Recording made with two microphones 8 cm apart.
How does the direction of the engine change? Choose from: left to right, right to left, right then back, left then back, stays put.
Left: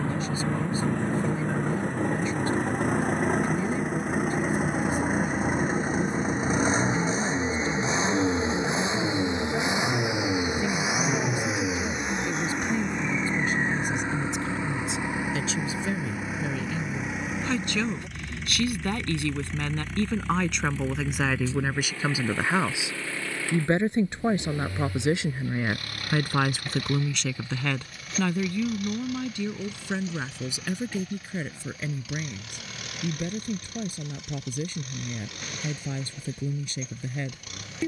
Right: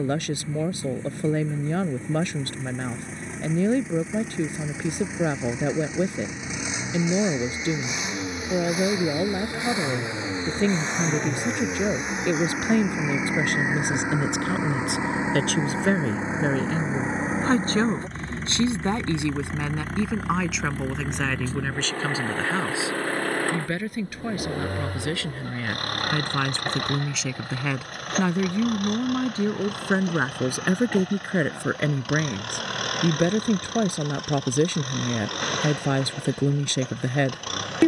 left to right.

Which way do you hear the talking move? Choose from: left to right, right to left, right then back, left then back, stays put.
left then back.